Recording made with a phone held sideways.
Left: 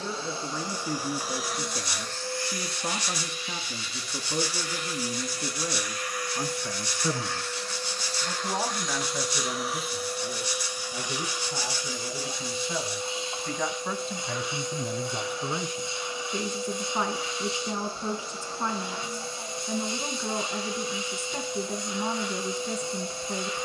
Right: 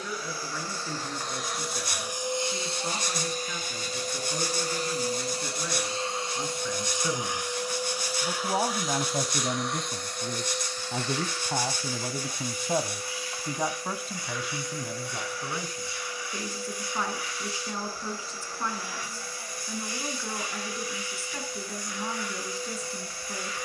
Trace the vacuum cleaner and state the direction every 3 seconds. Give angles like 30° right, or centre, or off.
centre, 40° right, 10° right, 10° left, 20° left, 20° left, 20° left, 20° left.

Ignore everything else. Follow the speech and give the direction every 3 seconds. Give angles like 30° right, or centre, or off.
20° left, 20° left, centre, 60° right, 20° right, 20° left, 20° left, 20° left.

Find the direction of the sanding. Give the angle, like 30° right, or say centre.
50° right.